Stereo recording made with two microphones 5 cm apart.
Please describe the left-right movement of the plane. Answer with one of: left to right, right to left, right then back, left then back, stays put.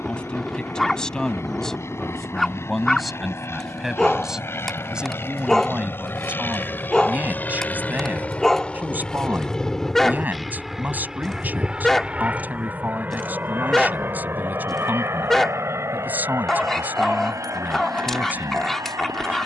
left to right.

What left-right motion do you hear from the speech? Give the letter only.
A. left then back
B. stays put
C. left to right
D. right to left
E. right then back
C.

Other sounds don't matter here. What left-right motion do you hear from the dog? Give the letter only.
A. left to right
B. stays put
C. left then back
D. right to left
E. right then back
B.